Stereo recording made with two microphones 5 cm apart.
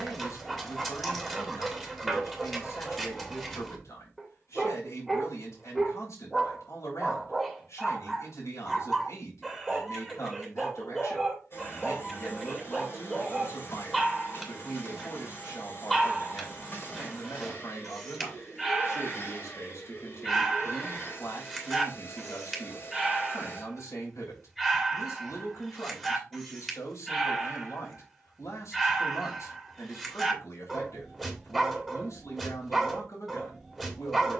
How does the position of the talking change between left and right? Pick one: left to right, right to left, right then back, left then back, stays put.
stays put.